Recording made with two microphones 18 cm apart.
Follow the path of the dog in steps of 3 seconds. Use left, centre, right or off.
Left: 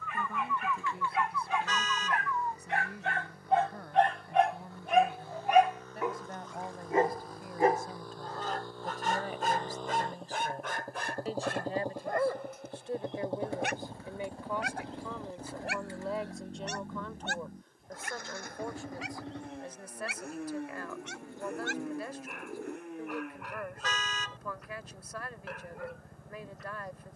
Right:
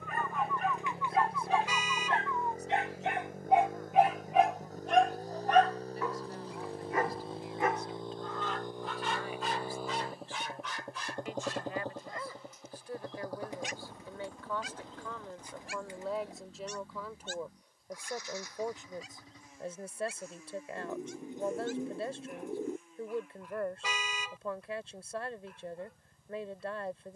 right, centre, left, left, left, left, left, left, left.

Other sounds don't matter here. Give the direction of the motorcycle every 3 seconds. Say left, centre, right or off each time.
right, right, right, centre, left, left, left, left, left.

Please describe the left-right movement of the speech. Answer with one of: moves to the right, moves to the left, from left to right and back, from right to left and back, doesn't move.
moves to the right.